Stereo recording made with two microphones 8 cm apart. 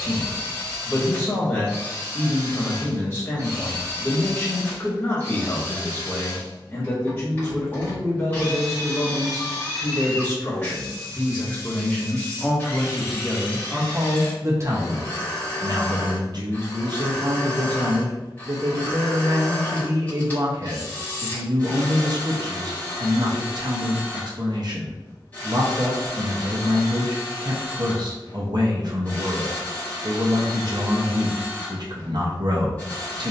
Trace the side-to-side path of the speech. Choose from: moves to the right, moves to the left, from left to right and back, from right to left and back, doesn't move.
moves to the right.